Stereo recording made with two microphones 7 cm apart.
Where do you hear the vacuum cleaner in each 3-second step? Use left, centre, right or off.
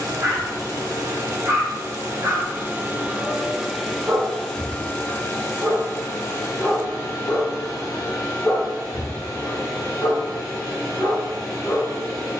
right, centre, left, left.